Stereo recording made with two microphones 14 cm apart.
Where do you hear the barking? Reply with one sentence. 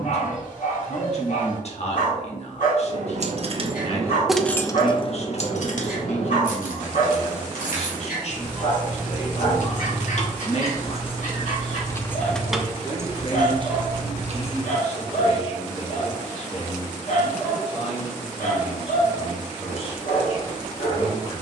You can hear the barking on the left.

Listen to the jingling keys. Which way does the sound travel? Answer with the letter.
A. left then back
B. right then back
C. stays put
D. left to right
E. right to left
A.